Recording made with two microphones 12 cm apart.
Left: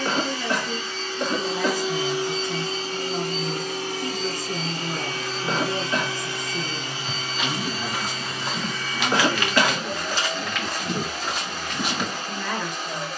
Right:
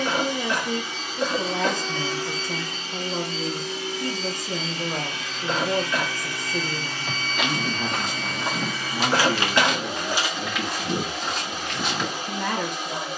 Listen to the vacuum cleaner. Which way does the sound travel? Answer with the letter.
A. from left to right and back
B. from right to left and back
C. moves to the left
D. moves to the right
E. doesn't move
B.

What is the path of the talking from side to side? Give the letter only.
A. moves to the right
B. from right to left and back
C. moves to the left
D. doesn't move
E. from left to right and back
D.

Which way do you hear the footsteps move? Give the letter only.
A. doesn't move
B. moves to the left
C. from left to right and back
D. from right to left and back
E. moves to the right
B.